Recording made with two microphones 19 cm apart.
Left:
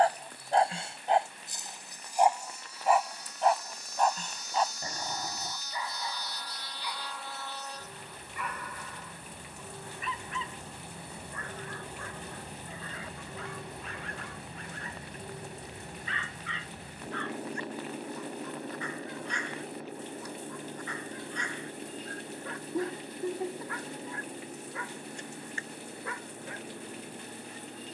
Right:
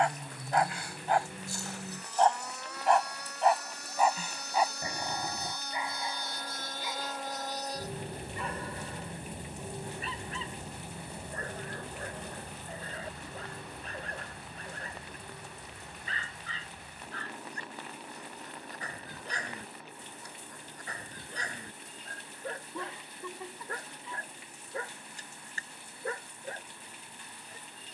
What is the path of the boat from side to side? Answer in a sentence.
You can hear the boat move from right to left.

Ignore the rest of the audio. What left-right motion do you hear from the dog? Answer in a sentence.
In this clip you hear the dog go from the left side to the right.